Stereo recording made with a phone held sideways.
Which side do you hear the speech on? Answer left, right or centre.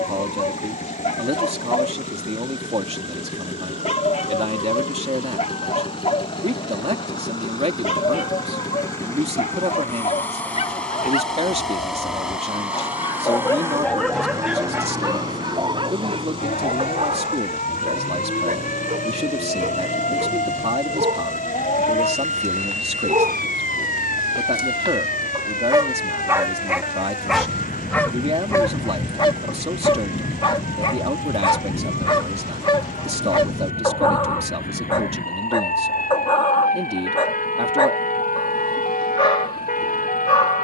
right.